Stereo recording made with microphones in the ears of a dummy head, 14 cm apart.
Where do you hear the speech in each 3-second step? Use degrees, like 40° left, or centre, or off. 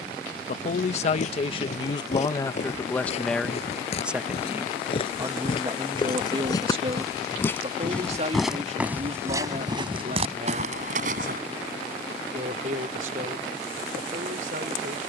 30° left, 10° right, 40° right, 50° right, 60° right.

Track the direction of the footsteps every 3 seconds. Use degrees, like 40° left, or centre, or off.
50° left, 40° left, 10° left, 40° right, off.